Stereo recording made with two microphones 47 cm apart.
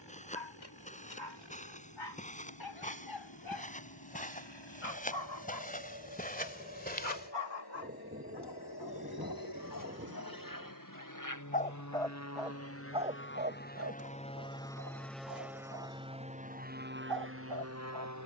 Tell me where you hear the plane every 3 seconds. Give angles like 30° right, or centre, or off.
70° left, 70° left, 60° left, 50° left, 20° left, 20° right.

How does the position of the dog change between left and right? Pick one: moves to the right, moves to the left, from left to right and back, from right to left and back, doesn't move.
moves to the right.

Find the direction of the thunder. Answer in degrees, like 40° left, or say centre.
20° right.